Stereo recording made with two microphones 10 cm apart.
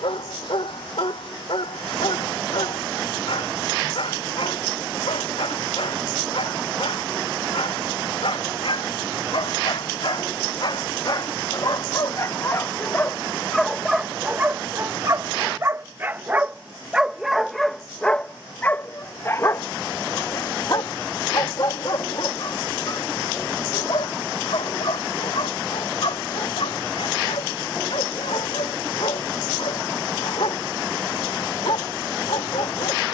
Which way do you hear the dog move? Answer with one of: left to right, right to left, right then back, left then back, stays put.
right then back.